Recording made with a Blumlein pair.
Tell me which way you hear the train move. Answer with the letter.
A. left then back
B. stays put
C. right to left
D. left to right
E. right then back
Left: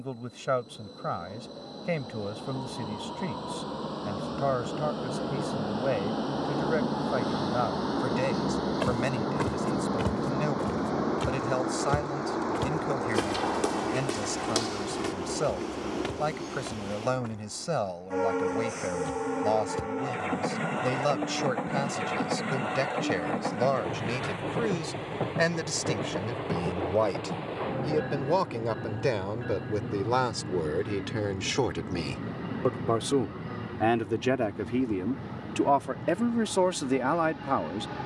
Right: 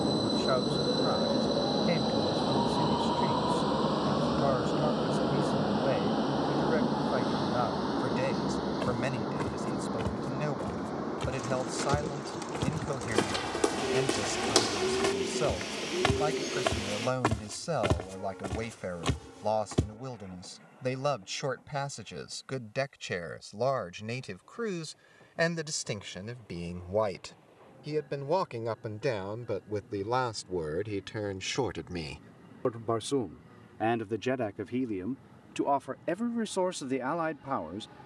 C.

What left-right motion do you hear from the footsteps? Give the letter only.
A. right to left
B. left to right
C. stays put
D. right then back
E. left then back
B.